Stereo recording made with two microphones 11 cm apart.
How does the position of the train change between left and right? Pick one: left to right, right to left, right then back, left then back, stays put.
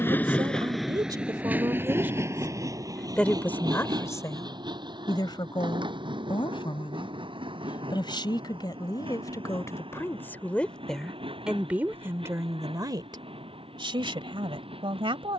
left to right.